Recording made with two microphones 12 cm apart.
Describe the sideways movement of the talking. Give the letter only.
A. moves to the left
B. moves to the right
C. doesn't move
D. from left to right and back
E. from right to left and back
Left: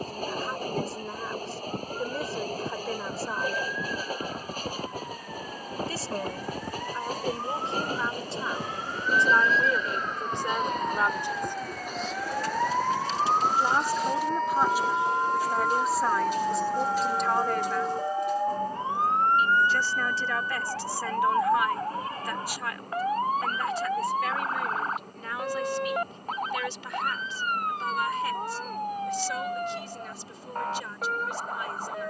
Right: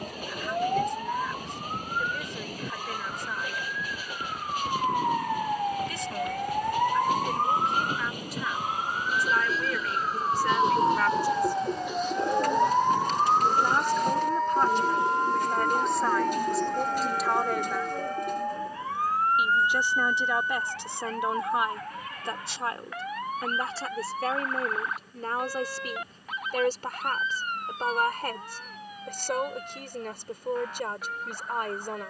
B.